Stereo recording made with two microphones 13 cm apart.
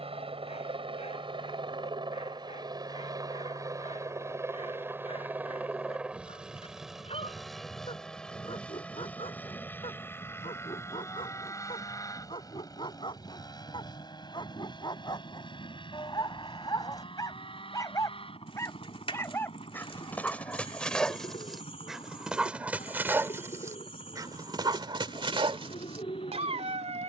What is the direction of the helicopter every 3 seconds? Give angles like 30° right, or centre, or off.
40° right, 20° right, centre, 20° left, 30° left, 40° left, 40° left, 50° left, 50° left.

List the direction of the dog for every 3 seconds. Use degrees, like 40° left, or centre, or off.
50° left, 50° left, 50° left, 40° left, 40° left, 30° left, 10° left, 10° right, 40° right.